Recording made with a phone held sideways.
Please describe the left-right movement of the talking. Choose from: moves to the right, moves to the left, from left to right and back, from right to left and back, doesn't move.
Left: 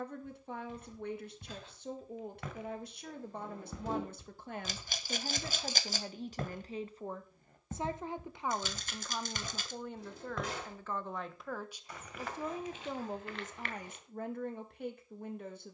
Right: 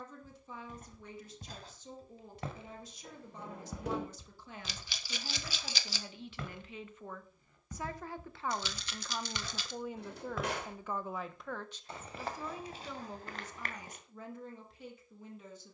from left to right and back.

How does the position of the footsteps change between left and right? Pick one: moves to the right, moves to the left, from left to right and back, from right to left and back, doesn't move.
from right to left and back.